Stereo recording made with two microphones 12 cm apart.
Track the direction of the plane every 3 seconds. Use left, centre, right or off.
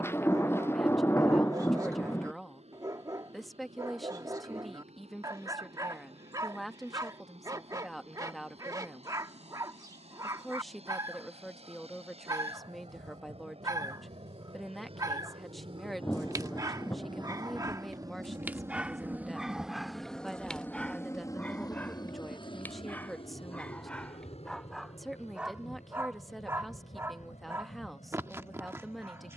right, right, right, right, right, right, centre, left, left, left.